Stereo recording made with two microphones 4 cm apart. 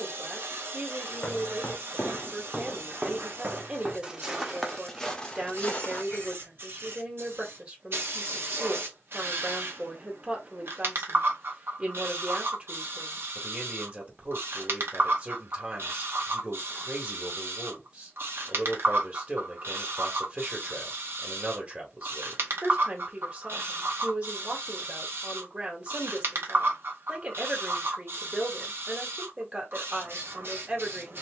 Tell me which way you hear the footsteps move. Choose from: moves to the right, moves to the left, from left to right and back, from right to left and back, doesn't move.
from left to right and back.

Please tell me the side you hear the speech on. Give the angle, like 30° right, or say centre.
30° right.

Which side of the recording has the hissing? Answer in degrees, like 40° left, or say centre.
60° right.